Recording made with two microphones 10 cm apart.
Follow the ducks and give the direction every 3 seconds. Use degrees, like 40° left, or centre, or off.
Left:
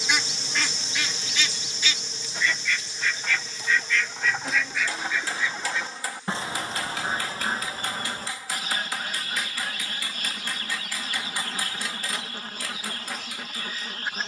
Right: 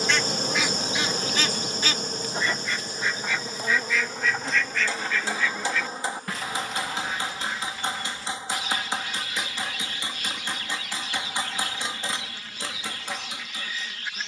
20° right, centre, 40° left, 40° left, 40° left.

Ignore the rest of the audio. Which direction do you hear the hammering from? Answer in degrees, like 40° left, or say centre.
20° right.